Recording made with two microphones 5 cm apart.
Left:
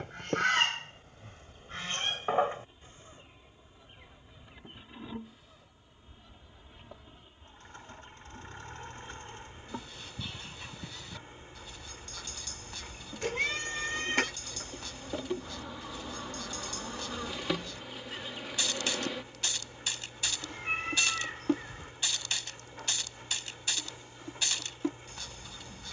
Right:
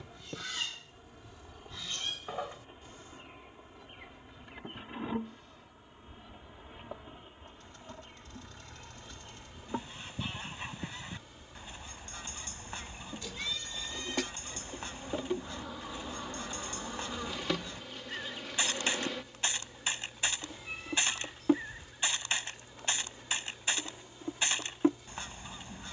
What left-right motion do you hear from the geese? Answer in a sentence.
You can hear the geese go from the left side to the right.